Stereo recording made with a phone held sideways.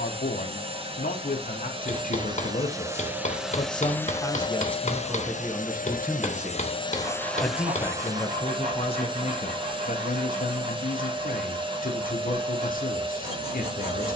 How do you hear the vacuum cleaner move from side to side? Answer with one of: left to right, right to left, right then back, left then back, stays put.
left then back.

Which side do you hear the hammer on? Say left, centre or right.
left.